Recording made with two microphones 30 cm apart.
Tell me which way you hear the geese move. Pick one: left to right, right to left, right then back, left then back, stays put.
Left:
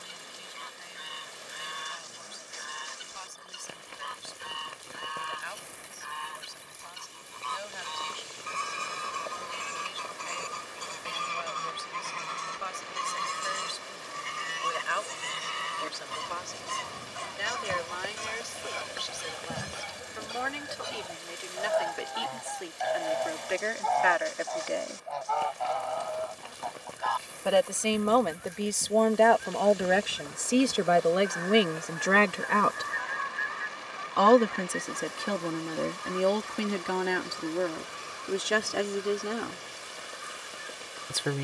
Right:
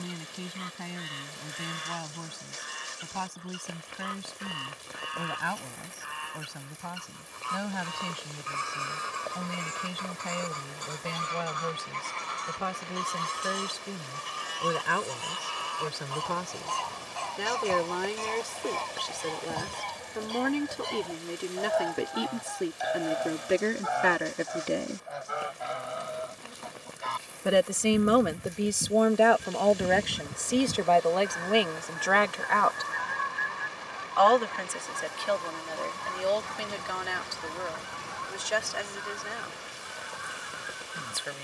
left to right.